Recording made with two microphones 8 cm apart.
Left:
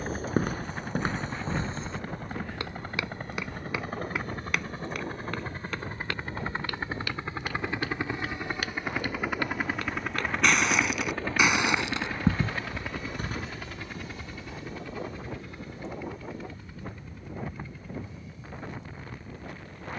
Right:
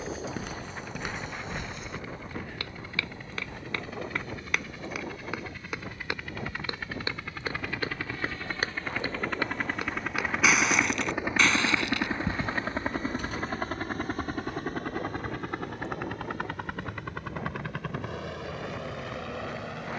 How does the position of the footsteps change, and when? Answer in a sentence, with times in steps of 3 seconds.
In this clip you hear the footsteps on the left from 0 s, in the centre from 3 s, on the right from 6 s, in the centre from 9 s, on the left from 12 s and not at all from 15 s.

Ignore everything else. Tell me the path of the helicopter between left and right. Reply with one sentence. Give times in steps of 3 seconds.
In this clip you hear the helicopter on the left from 0 s, in the centre from 9 s and on the right from 12 s.